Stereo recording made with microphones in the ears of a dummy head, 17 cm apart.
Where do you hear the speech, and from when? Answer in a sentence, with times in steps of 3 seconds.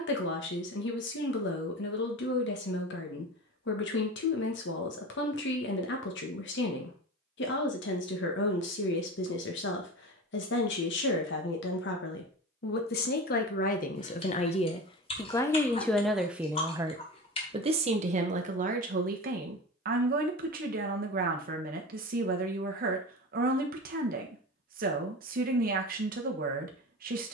You can hear the speech on the left from 0 s, in the centre from 15 s and on the right from 18 s.